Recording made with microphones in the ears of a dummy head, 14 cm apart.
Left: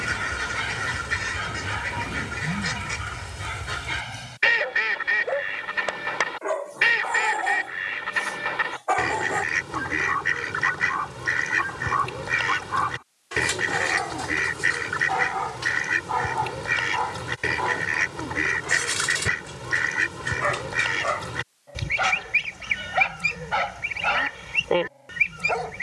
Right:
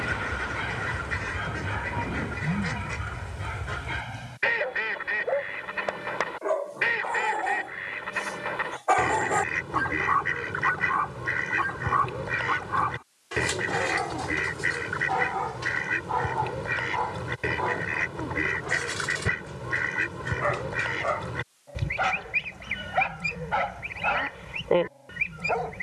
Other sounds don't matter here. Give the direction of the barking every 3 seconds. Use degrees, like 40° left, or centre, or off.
70° left, 70° left, 40° left, centre, 20° left, 40° left, 60° left, 70° left, 70° left.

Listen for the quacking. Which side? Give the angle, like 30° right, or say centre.
80° left.